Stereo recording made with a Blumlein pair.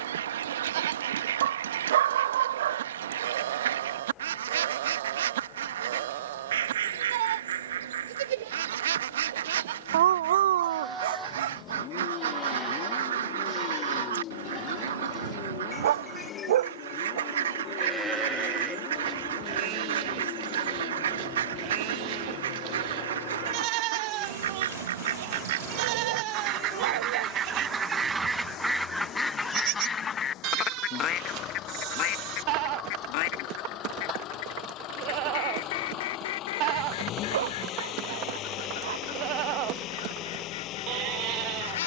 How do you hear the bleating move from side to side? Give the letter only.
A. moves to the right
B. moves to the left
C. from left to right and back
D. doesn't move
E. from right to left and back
E.